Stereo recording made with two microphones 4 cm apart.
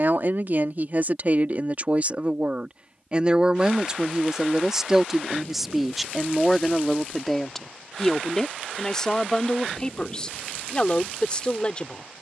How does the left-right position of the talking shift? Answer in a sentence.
You can hear the talking go from the right side to the left.